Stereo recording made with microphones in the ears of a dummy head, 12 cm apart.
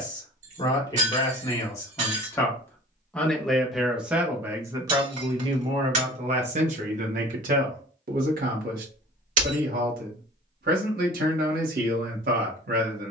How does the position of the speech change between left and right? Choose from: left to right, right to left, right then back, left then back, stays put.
left to right.